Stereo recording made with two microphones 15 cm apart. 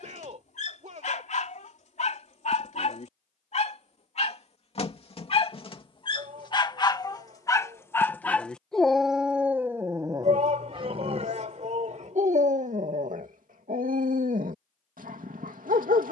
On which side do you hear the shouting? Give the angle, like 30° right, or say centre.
50° right.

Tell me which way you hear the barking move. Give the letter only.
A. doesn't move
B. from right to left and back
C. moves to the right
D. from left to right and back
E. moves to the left
C.